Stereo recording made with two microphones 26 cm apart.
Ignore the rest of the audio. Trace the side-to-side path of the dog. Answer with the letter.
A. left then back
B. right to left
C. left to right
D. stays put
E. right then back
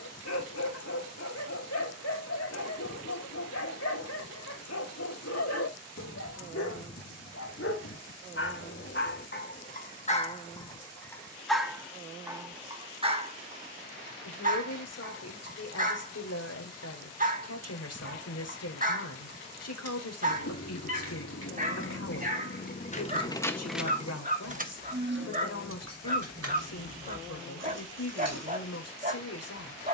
C.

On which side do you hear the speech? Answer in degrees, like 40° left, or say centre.
70° left.